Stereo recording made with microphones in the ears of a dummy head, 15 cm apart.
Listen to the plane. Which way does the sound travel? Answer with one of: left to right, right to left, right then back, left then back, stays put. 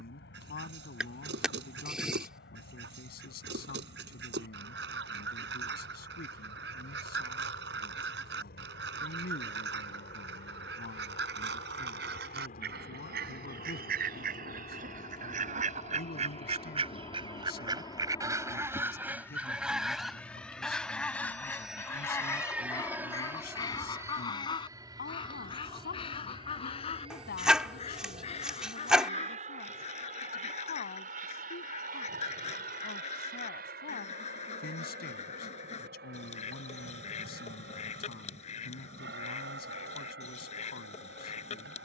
left to right.